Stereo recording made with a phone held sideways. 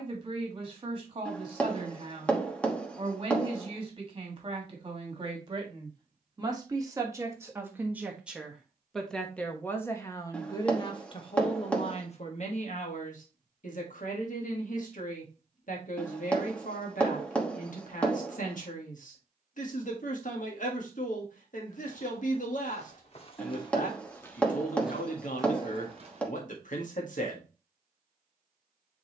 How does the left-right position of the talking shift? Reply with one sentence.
In this clip you hear the talking go from the right side to the left.